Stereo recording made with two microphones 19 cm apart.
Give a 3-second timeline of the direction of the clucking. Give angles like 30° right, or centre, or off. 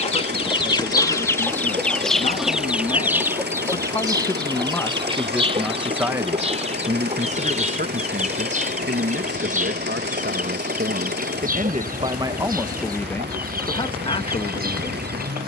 10° left, 20° right, 40° right, 50° right, 50° right.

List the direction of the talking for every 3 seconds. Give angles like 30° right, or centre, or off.
40° left, 10° left, 40° right, 60° right, 10° left.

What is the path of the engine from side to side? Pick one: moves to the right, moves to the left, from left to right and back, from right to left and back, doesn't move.
doesn't move.